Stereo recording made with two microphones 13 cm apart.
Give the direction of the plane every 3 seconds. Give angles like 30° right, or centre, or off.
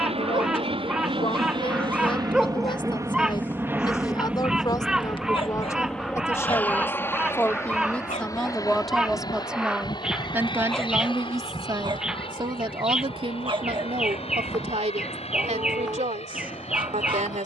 40° right, 10° right, 20° left, 40° left, 40° left, 50° left.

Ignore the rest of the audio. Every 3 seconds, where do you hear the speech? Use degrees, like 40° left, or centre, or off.
40° left, 30° left, 10° left, 20° right, 50° right, 70° right.